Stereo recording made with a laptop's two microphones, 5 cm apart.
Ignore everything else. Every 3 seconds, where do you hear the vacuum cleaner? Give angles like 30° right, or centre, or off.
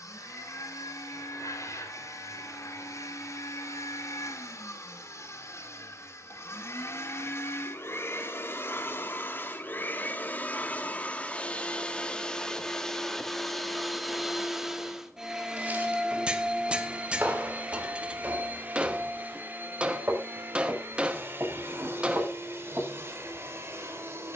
70° left, 60° left, 50° left, 30° left, centre, 20° right, 40° right, 50° right.